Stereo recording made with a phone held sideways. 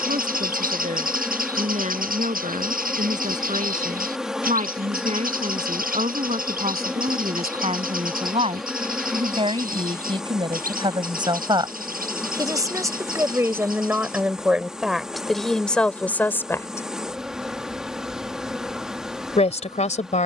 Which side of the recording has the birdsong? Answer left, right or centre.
right.